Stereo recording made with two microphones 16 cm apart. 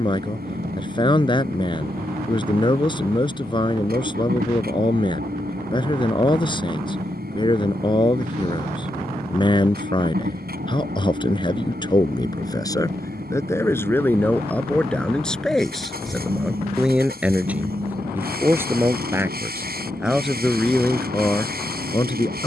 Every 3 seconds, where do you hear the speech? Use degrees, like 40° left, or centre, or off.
30° left, 30° left, 30° left, 30° left, 20° left, centre, 10° right, 20° left.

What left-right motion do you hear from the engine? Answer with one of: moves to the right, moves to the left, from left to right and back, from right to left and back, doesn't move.
doesn't move.